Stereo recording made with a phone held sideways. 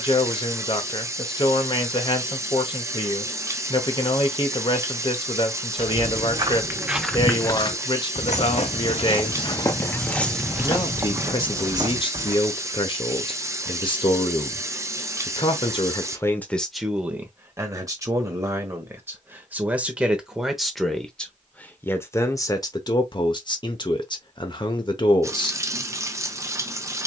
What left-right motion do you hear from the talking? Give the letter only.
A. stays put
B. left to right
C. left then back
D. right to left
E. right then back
E.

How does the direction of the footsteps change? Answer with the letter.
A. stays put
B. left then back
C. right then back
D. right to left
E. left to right
B.